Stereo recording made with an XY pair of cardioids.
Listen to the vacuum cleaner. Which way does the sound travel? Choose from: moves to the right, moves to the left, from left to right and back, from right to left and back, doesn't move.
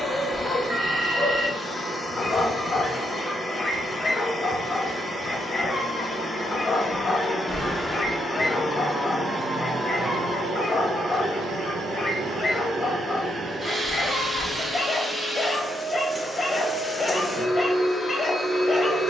from left to right and back.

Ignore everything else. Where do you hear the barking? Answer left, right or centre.
left.